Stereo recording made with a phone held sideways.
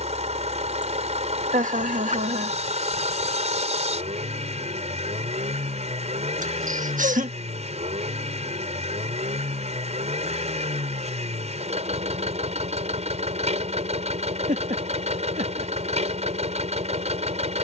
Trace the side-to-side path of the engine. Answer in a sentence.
In this clip you hear the engine stay in one place.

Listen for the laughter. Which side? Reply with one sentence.
In this clip you hear the laughter on the right.